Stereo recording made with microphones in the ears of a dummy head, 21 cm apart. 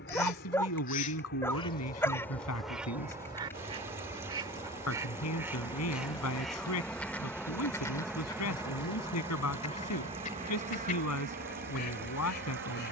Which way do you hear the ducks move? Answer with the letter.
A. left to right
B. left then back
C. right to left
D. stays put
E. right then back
E.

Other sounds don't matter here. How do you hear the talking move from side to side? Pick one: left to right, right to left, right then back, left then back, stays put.
stays put.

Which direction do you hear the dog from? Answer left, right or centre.
centre.